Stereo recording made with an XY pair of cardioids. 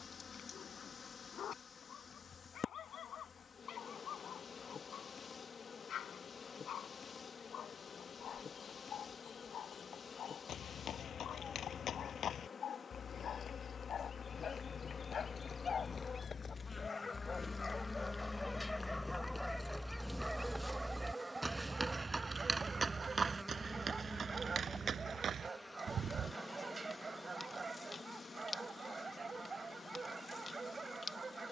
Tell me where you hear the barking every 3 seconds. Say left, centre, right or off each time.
left, left, left, left, left, left, centre, right, right, right, right.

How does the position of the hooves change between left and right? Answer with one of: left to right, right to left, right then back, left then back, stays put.
left to right.